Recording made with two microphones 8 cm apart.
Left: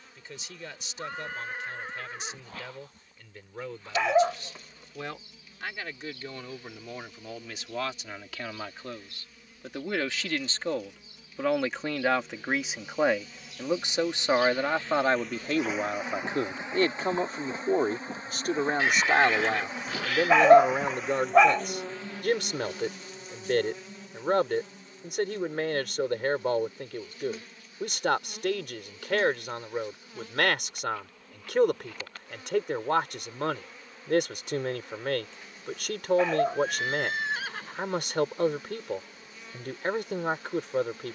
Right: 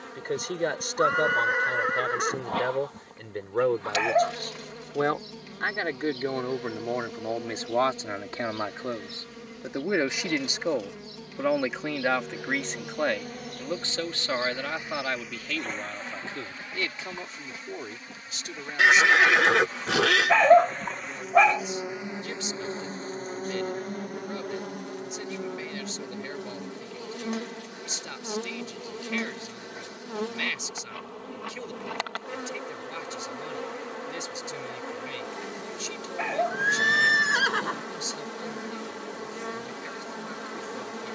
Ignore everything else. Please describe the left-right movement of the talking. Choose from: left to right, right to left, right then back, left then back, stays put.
right to left.